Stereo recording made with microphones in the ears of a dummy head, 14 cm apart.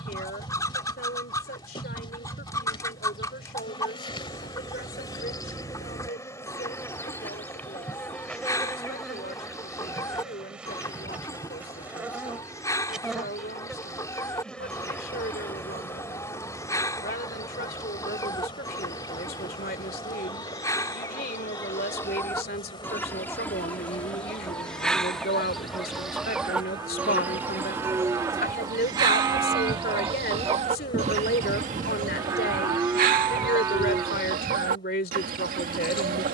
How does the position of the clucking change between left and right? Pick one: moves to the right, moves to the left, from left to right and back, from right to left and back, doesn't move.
moves to the right.